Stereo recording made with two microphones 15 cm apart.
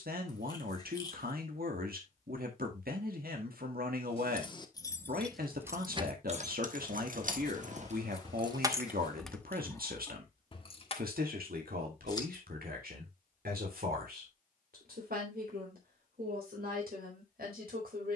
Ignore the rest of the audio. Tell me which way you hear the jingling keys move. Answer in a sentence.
You can hear the jingling keys go right and come back.